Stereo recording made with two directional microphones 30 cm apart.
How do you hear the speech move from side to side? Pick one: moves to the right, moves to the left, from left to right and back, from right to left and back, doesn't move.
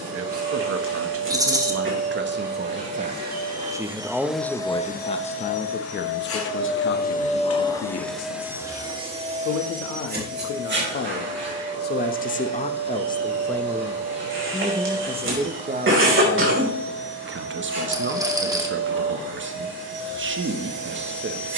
from right to left and back.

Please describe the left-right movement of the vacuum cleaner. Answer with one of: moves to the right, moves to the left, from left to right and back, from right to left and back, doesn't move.
from right to left and back.